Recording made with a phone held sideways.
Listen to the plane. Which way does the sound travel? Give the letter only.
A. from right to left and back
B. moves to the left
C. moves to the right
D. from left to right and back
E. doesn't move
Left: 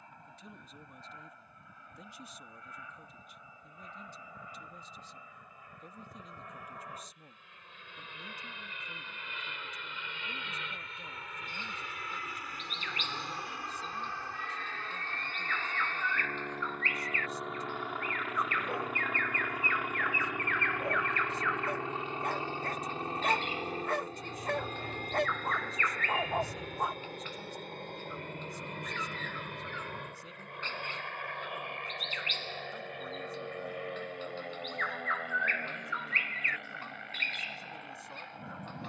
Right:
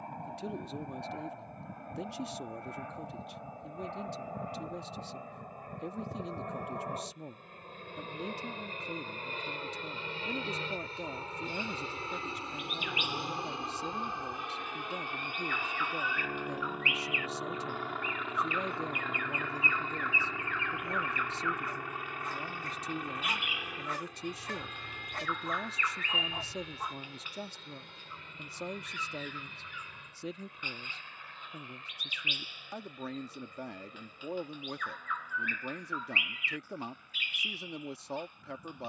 B.